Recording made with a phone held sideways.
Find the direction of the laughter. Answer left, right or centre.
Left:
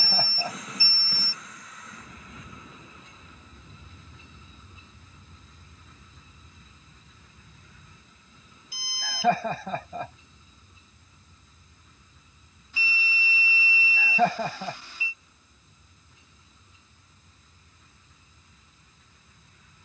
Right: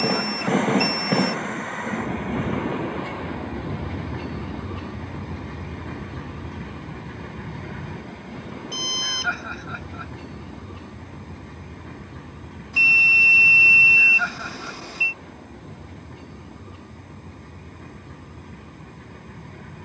left.